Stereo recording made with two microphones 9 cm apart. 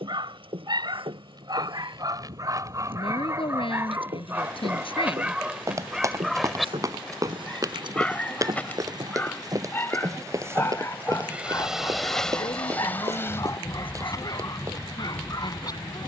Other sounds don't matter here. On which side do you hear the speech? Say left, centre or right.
left.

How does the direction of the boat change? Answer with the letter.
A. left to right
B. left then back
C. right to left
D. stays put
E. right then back
C.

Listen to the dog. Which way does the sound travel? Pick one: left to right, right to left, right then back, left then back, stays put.
right to left.